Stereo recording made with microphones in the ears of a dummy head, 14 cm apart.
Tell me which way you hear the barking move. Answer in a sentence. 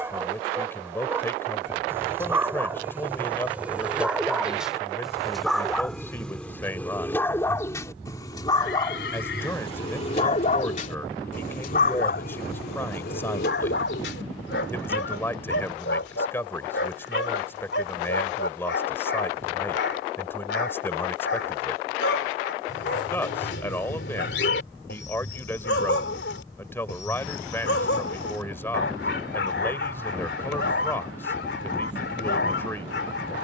You can hear the barking move to the left.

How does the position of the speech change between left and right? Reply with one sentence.
You can hear the speech stay in one place.